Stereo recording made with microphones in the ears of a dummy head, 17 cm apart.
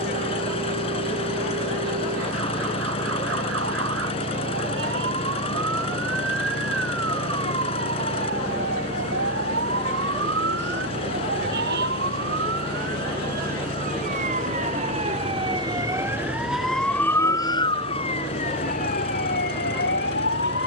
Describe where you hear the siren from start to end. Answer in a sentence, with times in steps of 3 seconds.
You can hear the siren on the right from 0 s, in the centre from 15 s and on the left from 18 s.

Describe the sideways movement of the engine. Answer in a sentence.
You can hear the engine stay put.